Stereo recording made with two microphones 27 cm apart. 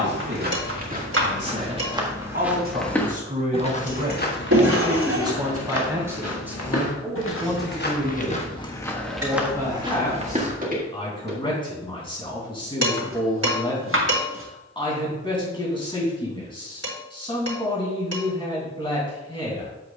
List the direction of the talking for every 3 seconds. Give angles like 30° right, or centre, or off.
40° right, 20° right, centre, 20° left, 20° left, 20° left, 20° left.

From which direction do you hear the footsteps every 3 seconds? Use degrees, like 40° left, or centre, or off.
20° right, 40° left, 40° left, 20° right, off, off, off.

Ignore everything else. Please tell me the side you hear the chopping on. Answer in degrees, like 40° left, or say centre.
50° right.